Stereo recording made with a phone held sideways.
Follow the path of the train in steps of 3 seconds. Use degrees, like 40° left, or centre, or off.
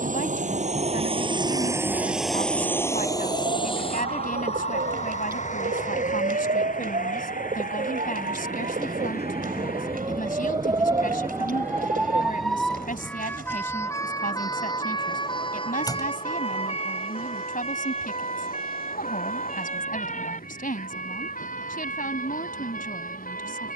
20° right, 40° left, 60° left, 60° left, 70° left, 70° left, 70° left, 70° left.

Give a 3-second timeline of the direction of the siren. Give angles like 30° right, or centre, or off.
80° right, 70° right, 60° right, 30° right, 10° left, 40° left, 50° left, 60° left.